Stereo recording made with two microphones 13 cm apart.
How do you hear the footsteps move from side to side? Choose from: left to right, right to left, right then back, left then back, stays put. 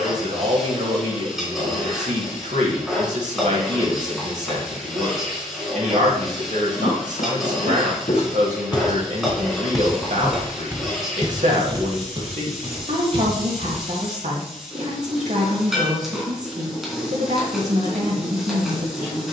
left to right.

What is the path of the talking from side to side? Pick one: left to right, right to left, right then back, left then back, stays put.
stays put.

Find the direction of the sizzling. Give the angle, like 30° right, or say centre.
centre.